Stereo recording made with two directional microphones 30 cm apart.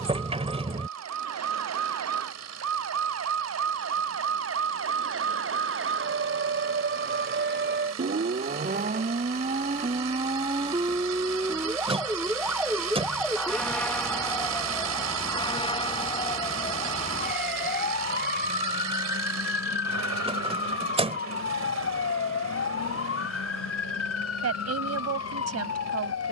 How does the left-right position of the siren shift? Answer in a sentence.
In this clip you hear the siren move to the left.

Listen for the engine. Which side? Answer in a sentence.
You can hear the engine on the right.